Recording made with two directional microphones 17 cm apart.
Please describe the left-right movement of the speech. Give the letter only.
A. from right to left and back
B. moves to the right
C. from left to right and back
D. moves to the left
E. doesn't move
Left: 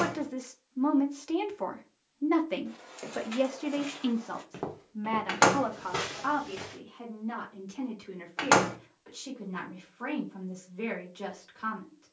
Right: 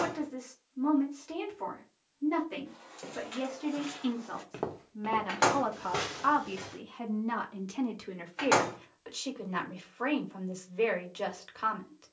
B.